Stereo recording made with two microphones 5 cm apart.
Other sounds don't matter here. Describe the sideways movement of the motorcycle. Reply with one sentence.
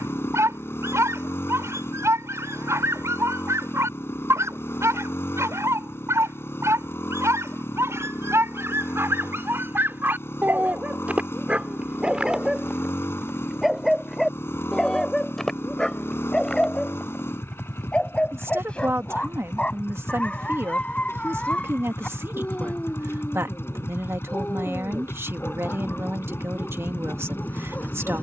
In this clip you hear the motorcycle stay put.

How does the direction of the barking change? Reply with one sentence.
In this clip you hear the barking go from the right side to the left.